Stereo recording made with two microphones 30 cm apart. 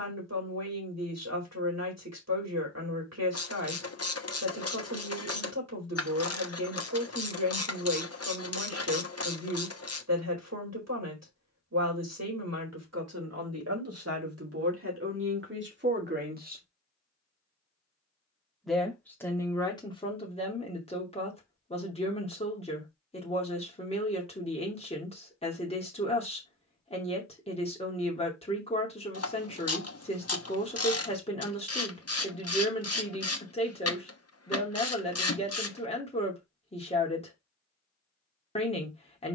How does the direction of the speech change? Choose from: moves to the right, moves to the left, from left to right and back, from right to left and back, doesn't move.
moves to the left.